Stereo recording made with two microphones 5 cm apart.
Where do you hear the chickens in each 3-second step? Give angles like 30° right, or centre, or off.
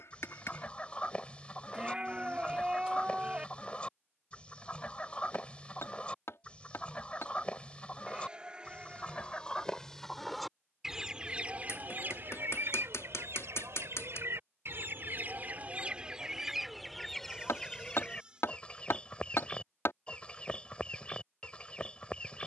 30° left, 30° left, 30° left, centre, 60° right, 10° right, 20° left, 20° left.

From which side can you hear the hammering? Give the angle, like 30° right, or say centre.
70° left.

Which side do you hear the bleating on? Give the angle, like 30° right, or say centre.
20° right.